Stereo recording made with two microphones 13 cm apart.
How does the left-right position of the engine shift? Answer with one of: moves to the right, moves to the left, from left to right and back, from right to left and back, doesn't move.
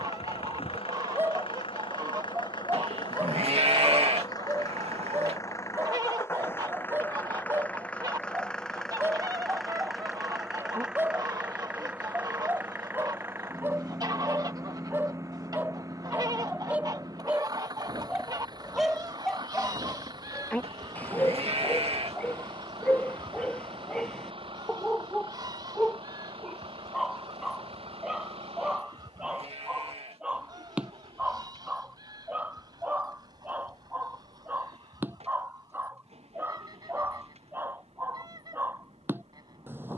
moves to the right.